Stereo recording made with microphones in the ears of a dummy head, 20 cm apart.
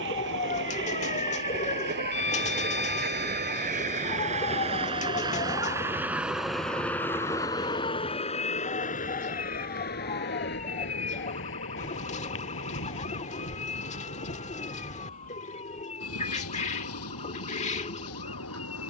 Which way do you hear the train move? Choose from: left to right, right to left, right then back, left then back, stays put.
right to left.